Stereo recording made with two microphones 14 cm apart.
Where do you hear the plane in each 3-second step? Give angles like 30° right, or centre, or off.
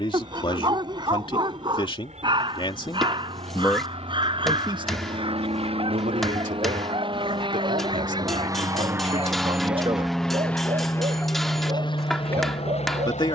60° right, 60° right, 40° right, 10° left, 40° left.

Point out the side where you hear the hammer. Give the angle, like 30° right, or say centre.
centre.